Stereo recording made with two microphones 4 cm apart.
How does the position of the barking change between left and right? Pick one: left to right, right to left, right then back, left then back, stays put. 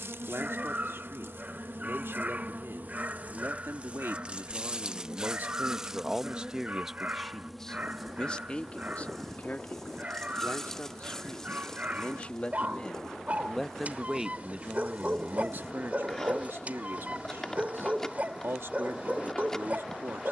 stays put.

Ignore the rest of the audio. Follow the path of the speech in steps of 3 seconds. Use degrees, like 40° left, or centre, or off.
80° right, 60° right, centre, 40° left, centre, 60° right, 70° right.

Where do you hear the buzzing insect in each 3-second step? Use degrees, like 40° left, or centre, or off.
60° right, 30° right, centre, 10° left, 10° left, 10° left, 10° left.